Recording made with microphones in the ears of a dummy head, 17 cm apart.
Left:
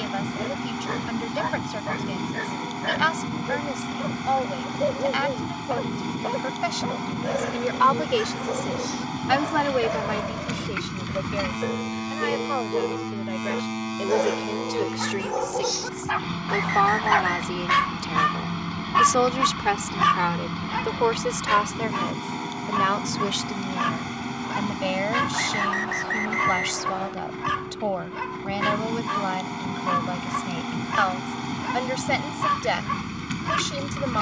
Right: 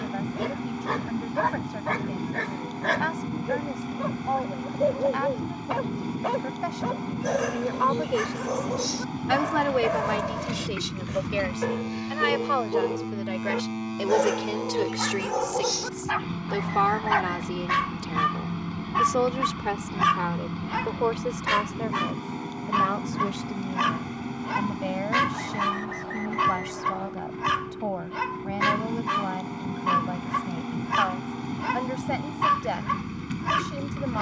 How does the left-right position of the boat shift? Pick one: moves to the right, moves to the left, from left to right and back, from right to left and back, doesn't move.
doesn't move.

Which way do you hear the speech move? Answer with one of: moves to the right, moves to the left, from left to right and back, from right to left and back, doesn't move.
from left to right and back.